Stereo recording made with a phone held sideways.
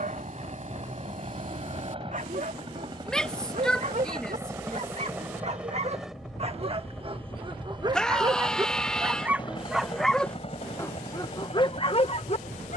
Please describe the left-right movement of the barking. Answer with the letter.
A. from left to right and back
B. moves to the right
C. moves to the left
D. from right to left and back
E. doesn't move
C.